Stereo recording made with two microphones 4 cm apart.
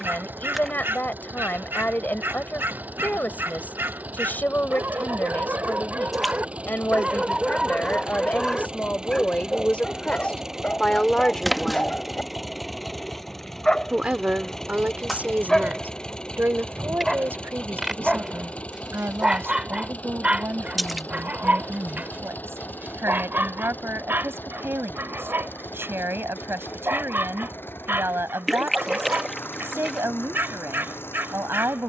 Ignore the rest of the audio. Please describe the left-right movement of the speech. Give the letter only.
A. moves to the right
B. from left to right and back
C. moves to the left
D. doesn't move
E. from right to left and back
A.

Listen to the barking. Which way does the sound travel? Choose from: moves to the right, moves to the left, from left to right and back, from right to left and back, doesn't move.
from right to left and back.